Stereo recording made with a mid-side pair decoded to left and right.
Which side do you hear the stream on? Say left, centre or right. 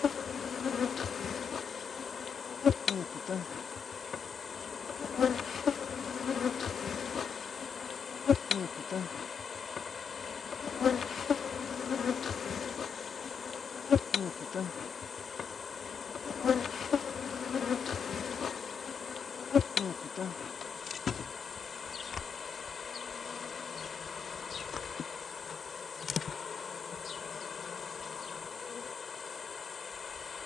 left.